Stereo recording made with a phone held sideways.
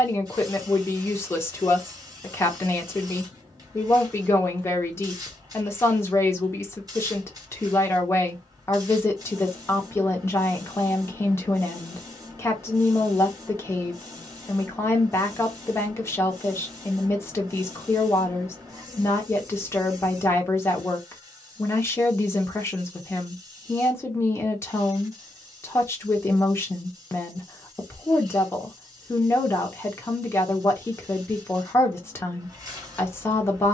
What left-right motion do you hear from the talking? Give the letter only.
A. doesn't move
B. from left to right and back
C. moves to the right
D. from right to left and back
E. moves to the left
A.